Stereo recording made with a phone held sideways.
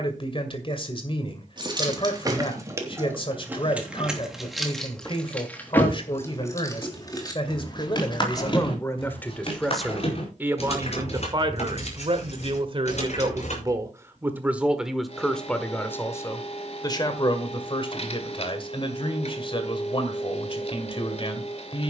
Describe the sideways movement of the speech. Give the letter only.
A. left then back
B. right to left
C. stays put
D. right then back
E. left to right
D.